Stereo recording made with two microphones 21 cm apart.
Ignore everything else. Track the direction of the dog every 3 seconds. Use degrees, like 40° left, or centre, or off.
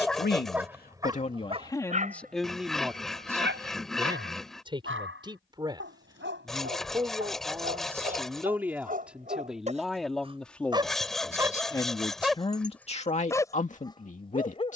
20° right, 60° right, 50° right, 20° right, 10° left.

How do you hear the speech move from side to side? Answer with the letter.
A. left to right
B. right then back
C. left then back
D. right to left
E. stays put
B.